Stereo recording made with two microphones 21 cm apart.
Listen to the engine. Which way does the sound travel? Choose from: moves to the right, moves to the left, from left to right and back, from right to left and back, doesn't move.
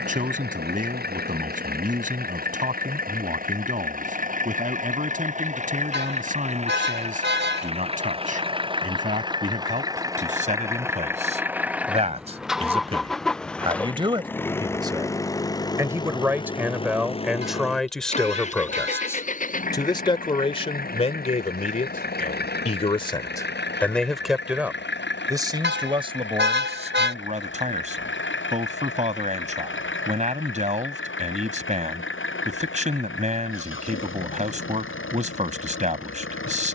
moves to the left.